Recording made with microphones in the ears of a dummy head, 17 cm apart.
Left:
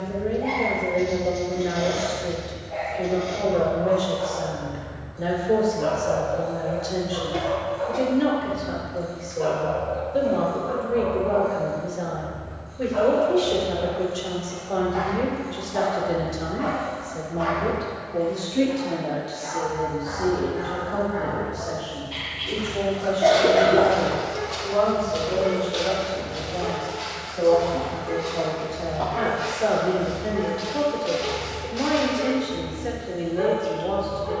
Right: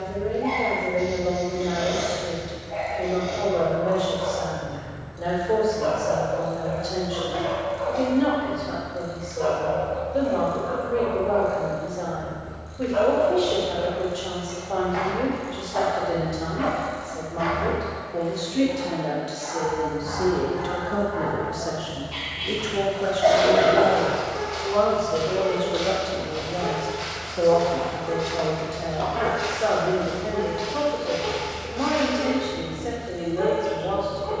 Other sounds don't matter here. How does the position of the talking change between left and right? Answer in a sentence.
You can hear the talking move from left to right and back again.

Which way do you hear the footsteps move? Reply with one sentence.
You can hear the footsteps move from left to right and back again.